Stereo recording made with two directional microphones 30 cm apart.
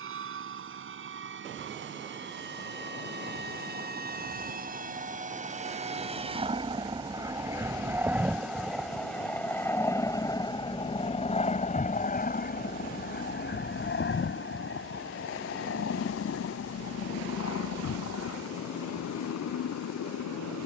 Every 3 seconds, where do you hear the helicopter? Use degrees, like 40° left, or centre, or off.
50° right, 30° right, 10° right, 10° left, 40° left, 50° left, 60° left.